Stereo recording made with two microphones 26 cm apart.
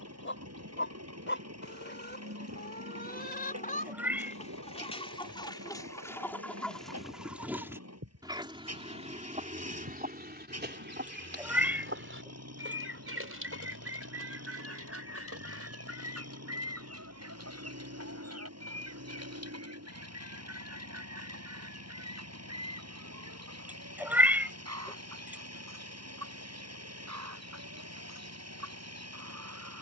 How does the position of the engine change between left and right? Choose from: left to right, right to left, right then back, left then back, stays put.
stays put.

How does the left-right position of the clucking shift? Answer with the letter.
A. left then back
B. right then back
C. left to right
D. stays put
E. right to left
C.